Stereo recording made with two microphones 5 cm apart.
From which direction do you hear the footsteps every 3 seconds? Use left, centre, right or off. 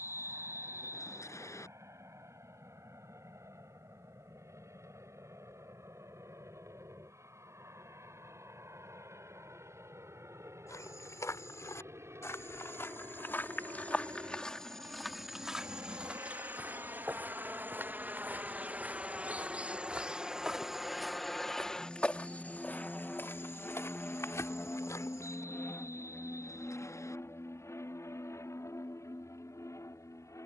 off, off, off, left, left, right, right, left, left, off.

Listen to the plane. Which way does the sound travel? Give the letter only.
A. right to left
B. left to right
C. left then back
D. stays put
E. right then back
A.